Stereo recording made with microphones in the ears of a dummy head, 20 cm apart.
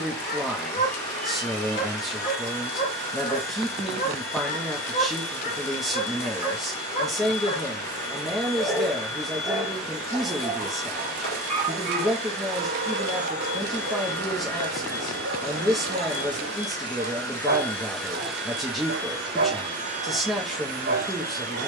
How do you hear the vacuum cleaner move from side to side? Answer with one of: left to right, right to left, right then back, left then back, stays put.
left to right.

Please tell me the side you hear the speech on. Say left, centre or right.
centre.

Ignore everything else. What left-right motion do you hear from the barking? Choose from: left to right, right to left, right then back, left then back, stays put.
left to right.